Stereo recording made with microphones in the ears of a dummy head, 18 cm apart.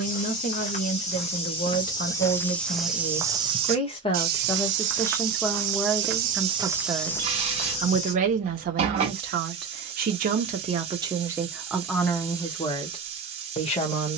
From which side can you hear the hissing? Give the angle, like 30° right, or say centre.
30° right.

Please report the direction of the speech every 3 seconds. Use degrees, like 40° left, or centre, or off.
40° left, 20° left, 30° right, 30° right, 20° left.